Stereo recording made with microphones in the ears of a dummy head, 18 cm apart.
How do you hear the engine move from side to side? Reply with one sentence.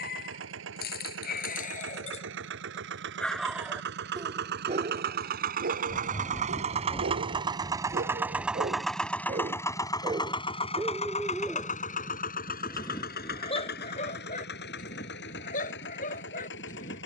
You can hear the engine move to the left.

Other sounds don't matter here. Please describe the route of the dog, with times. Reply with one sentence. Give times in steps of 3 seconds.
In this clip you hear the dog on the left from 0 s, on the right from 3 s, in the centre from 9 s and on the left from 12 s.